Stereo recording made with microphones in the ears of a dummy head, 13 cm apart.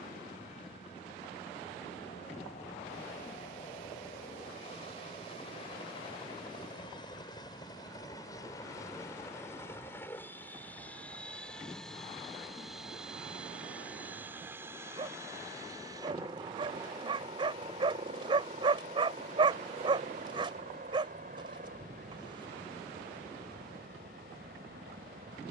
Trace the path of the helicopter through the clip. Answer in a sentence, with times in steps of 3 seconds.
In this clip you hear the helicopter on the left from 0 s, in the centre from 9 s and on the right from 15 s.